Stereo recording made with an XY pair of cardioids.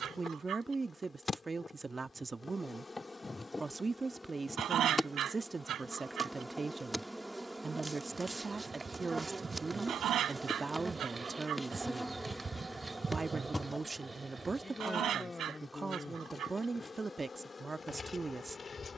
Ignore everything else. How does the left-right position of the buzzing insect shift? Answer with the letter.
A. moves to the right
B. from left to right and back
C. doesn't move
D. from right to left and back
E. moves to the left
B.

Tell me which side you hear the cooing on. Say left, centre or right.
right.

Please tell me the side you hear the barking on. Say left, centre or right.
right.